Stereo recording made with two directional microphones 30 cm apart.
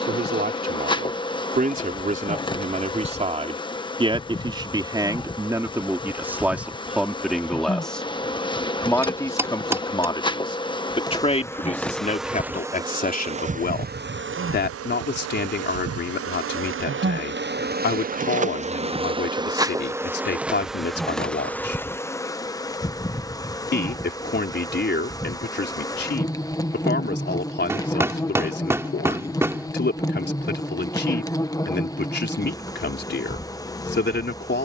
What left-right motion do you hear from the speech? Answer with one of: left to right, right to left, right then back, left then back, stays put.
right to left.